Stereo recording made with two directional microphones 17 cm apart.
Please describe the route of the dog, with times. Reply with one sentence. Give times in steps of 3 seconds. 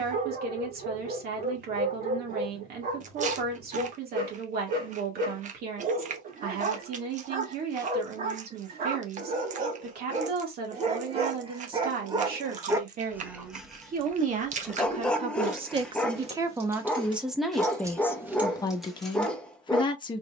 In this clip you hear the dog on the right from 0 s and in the centre from 12 s.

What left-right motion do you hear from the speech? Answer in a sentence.
You can hear the speech move from right to left.